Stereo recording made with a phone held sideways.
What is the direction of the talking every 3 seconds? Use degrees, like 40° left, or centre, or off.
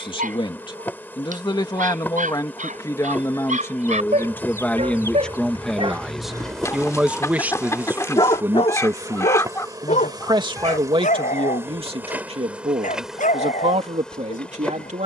30° left, 10° left, 10° right, 40° right, 50° right.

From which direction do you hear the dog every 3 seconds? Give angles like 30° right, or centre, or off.
70° right, 60° right, centre, 70° left, 70° left.